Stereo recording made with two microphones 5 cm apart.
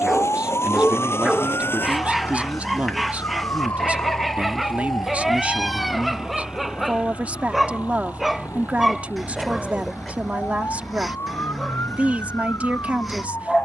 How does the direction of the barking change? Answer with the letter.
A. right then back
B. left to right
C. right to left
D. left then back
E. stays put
E.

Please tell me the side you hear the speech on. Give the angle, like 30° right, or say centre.
30° right.